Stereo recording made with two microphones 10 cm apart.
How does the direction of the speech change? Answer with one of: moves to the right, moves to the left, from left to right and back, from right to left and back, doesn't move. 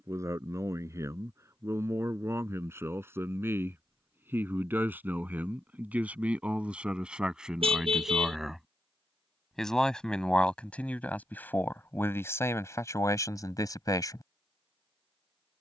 moves to the left.